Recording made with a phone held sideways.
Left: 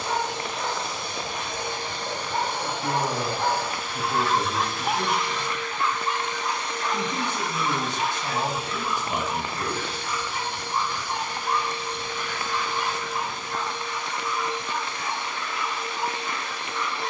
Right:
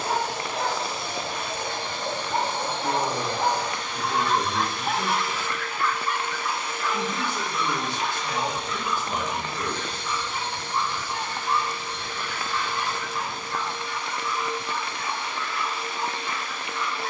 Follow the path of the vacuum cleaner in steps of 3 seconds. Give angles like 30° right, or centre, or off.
20° left, centre, centre, 10° left, 20° left, 20° left.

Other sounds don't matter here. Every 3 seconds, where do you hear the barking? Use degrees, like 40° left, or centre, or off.
40° right, centre, 40° left, 60° left, 70° left, 70° left.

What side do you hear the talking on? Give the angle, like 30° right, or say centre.
20° left.